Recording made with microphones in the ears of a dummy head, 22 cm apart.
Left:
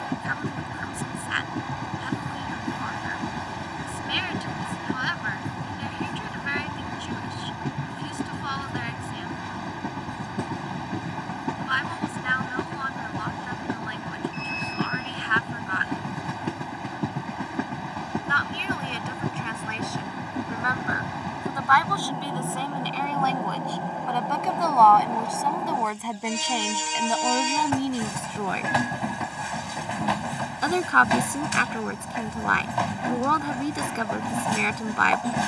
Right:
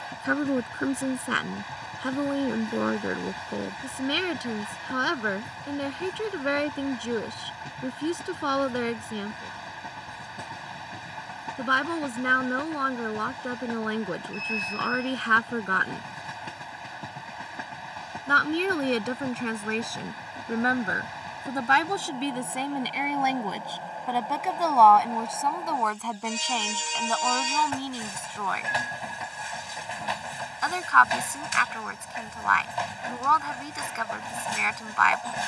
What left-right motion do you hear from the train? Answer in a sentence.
You can hear the train stay put.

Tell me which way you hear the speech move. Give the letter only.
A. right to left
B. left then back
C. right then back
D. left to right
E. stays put
A.